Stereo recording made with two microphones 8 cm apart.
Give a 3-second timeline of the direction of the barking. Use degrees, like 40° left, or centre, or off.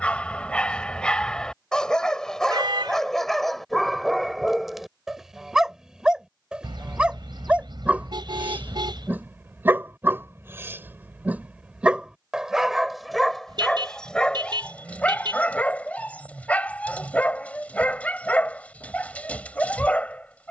10° left, centre, 10° right, 20° right, 10° left, 20° left, 20° left.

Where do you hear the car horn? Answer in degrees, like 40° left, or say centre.
70° right.